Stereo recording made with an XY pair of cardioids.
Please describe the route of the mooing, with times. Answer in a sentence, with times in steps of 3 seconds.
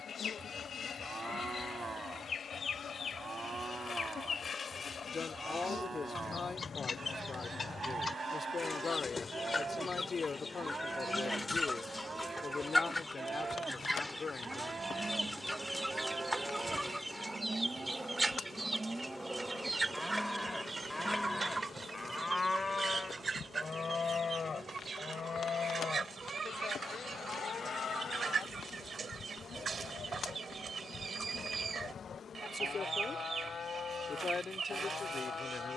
You can hear the mooing on the right from 0 s, in the centre from 18 s and on the left from 21 s.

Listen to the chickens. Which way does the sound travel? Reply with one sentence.
You can hear the chickens travel towards the right.